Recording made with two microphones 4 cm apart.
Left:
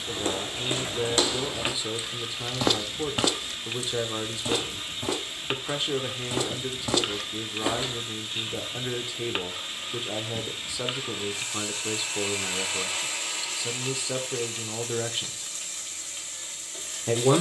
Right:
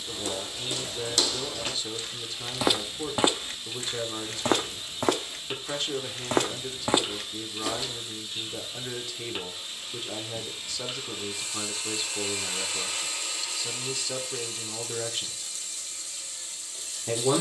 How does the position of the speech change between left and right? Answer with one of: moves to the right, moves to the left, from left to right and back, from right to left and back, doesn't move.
doesn't move.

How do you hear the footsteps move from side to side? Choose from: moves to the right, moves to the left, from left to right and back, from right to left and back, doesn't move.
from left to right and back.